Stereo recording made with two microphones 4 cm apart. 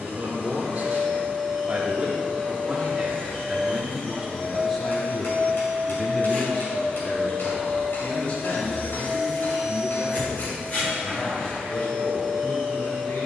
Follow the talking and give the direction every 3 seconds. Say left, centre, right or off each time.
right, centre, left, left, left.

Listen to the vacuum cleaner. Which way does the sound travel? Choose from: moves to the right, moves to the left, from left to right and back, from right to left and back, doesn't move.
doesn't move.